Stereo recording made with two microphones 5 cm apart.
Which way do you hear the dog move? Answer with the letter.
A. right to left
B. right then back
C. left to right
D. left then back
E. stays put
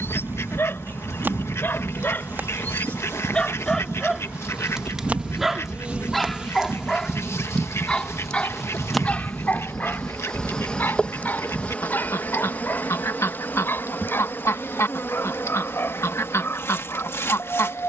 B.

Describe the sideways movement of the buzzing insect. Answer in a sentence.
You can hear the buzzing insect move from right to left.